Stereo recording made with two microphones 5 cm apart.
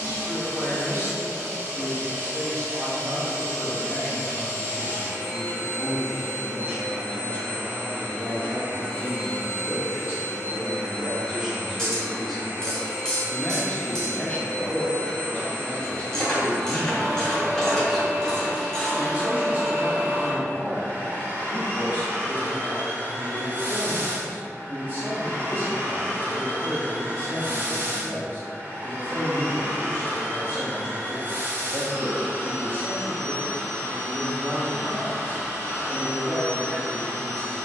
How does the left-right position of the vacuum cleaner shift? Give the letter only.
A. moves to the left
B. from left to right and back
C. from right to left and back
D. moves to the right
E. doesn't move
E.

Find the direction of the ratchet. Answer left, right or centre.
centre.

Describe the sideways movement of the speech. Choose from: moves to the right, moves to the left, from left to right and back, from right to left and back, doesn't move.
from right to left and back.